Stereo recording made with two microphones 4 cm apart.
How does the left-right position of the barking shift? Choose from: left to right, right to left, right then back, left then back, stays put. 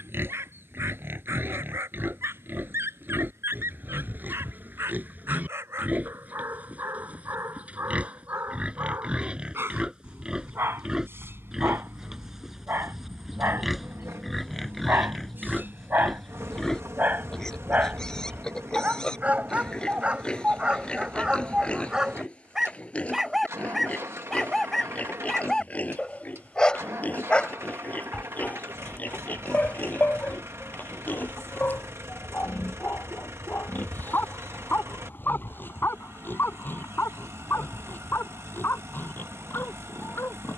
right to left.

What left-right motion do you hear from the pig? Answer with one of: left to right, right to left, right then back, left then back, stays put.
right to left.